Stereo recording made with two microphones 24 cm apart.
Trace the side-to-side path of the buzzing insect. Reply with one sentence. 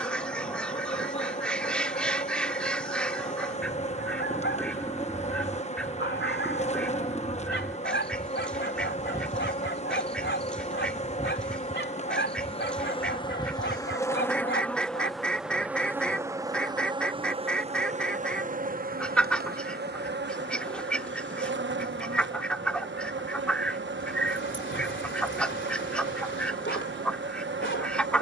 You can hear the buzzing insect move from left to right.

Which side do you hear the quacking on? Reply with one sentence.
You can hear the quacking in the centre.